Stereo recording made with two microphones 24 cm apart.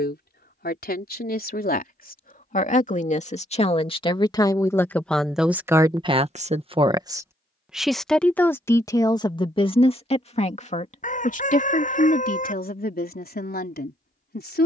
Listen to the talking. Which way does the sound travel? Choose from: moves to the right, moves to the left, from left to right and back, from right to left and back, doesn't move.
from left to right and back.